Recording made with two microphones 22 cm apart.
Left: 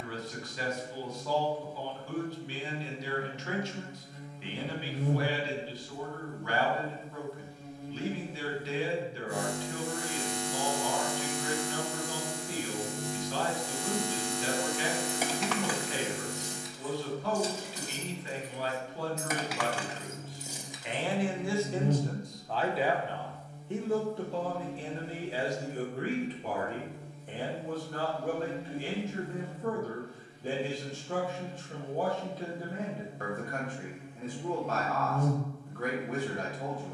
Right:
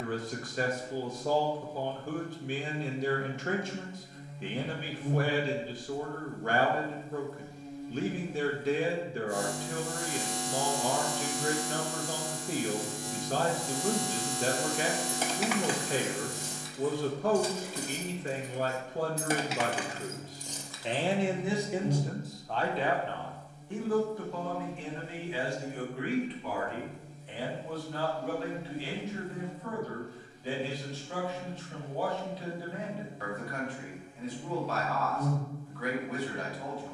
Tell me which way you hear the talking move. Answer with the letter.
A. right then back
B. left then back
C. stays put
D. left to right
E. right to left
E.